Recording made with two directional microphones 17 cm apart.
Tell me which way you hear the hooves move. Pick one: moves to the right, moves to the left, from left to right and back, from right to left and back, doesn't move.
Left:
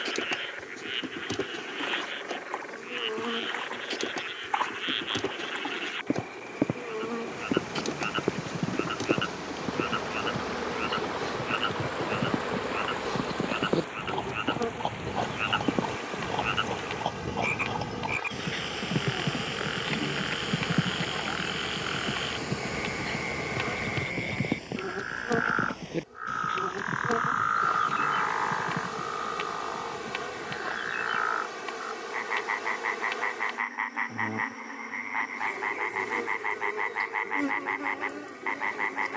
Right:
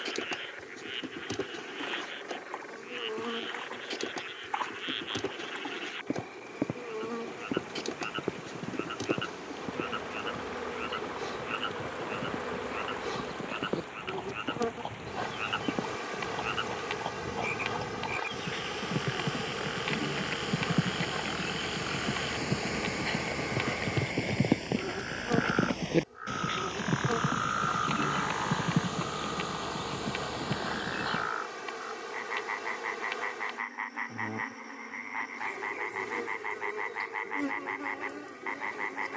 moves to the right.